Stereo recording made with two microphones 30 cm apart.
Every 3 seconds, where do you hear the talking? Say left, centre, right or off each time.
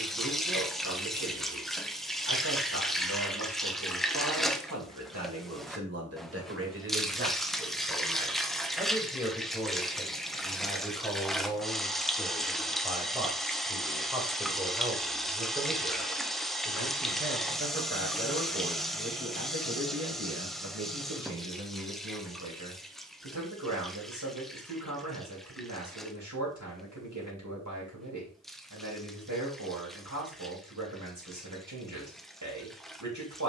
right, right, right, centre, centre, right, right, right, right, right, right.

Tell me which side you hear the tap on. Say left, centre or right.
centre.